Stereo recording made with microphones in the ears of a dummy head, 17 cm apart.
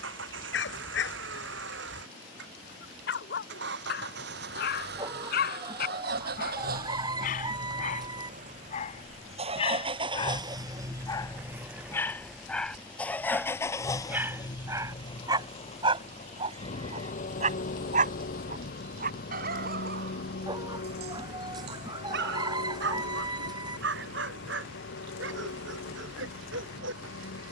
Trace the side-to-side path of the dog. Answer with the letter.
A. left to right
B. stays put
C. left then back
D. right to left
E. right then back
A.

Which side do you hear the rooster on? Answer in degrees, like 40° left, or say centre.
20° right.